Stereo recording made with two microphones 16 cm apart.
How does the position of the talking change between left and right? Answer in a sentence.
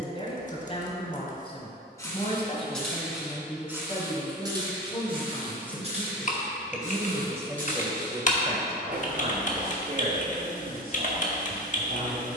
You can hear the talking go from the left side to the right.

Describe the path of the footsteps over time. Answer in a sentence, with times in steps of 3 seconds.
You can hear the footsteps in the centre from 0 s and on the right from 3 s.